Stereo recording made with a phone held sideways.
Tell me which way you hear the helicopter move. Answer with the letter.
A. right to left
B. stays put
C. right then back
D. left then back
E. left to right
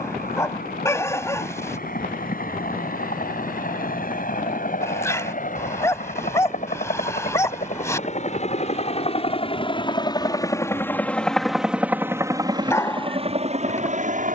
E.